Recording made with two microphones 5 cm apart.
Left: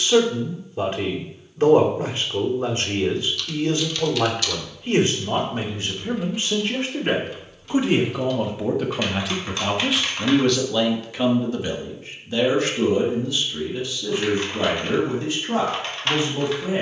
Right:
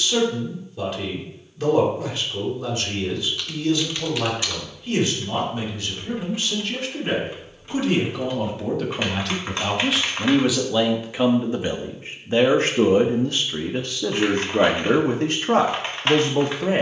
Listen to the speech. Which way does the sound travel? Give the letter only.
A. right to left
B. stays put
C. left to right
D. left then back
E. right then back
C.